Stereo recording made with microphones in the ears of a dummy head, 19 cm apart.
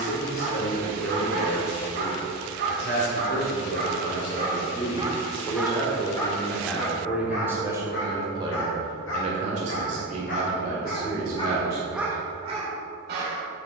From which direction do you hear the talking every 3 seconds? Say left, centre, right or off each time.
left, left, centre, right, off.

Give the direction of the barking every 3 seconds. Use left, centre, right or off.
right, right, left, left, right.